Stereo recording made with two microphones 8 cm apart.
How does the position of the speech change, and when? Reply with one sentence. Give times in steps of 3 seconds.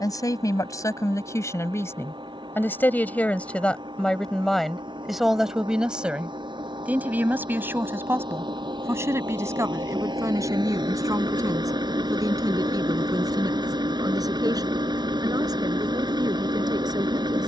In this clip you hear the speech on the left from 0 s, in the centre from 3 s and on the right from 6 s.